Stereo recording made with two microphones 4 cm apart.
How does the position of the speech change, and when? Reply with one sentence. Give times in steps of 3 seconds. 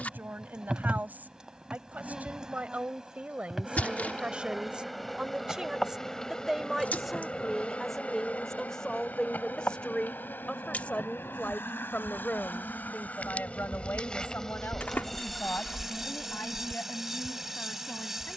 You can hear the speech on the right from 0 s, in the centre from 6 s and on the left from 9 s.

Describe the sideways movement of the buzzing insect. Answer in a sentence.
You can hear the buzzing insect go left and come back.